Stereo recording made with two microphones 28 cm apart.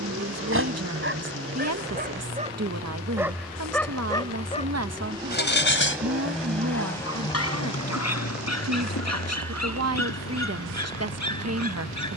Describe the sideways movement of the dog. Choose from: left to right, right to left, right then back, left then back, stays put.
right to left.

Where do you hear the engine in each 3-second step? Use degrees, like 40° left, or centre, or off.
50° right, 20° right, 20° left, 60° left.